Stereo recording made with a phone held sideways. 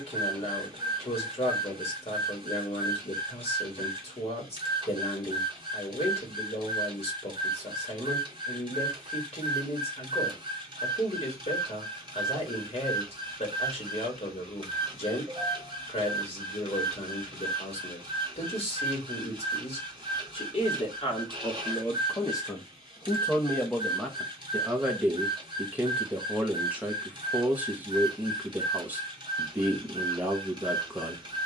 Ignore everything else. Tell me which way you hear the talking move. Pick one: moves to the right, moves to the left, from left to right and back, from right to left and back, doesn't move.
moves to the right.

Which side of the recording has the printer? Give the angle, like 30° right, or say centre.
30° right.